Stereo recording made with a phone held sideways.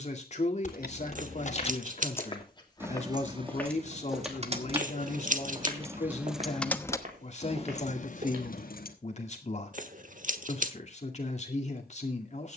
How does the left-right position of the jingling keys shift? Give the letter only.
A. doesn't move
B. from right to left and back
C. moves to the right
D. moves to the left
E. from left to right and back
E.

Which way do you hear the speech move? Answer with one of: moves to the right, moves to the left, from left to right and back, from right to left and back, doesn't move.
doesn't move.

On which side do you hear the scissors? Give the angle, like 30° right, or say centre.
60° right.